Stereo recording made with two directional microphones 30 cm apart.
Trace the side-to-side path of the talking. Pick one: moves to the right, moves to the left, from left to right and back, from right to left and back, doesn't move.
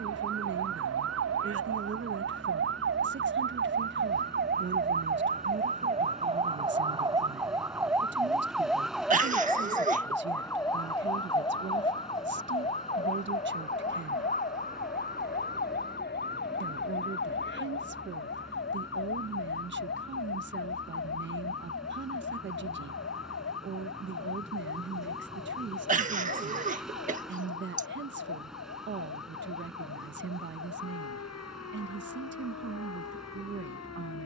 doesn't move.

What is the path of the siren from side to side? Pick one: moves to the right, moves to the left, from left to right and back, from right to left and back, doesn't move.
moves to the left.